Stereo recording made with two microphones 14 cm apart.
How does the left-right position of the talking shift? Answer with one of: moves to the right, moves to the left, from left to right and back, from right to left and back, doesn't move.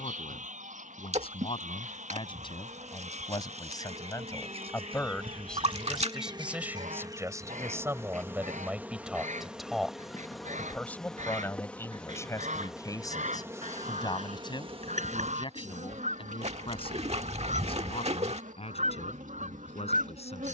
from left to right and back.